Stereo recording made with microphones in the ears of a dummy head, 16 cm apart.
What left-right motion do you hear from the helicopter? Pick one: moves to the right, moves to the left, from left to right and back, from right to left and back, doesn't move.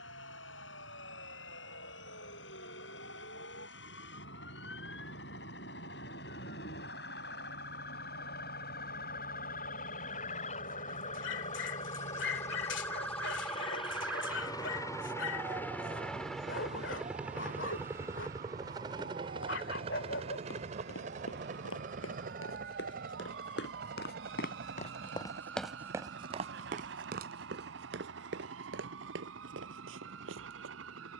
moves to the right.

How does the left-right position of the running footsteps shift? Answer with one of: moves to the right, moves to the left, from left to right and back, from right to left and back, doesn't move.
moves to the right.